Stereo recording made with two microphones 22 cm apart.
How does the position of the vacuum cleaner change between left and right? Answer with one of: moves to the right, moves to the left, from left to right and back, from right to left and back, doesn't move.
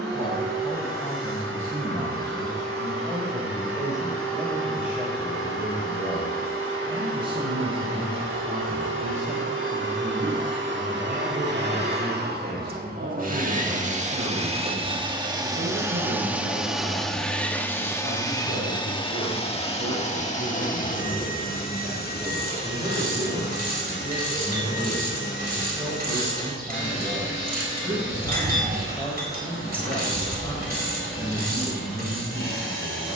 moves to the left.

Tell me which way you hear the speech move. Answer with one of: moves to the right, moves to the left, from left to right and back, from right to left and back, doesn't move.
from left to right and back.